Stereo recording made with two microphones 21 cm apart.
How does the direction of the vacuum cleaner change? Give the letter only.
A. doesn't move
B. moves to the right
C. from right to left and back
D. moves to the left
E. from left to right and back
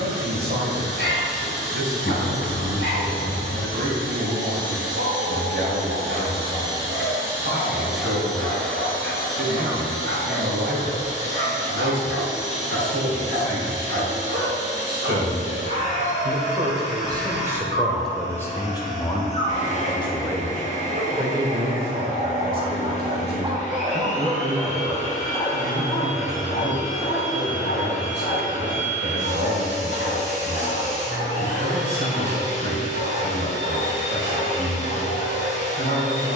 D.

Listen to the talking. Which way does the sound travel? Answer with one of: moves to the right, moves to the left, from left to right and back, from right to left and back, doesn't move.
from right to left and back.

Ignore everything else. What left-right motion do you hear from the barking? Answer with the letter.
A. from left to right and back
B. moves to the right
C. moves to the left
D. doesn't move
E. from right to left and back
C.